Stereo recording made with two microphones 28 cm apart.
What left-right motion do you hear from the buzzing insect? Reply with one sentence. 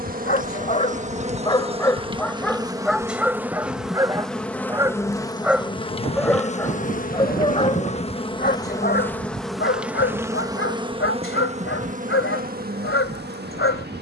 You can hear the buzzing insect move from right to left and back again.